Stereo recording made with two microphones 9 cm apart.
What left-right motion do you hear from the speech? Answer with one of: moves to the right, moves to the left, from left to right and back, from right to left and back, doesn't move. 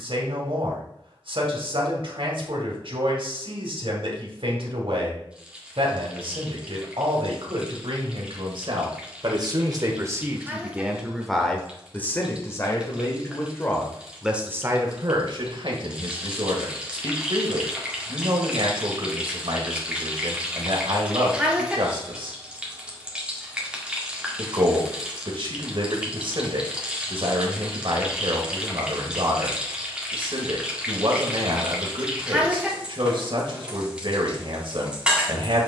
from right to left and back.